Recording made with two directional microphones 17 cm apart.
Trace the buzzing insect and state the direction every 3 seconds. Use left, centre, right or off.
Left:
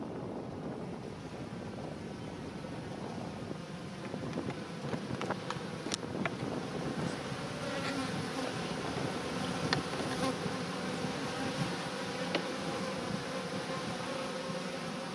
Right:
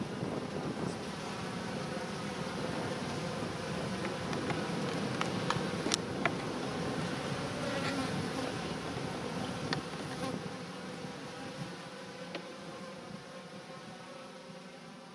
right, right, centre, left, left.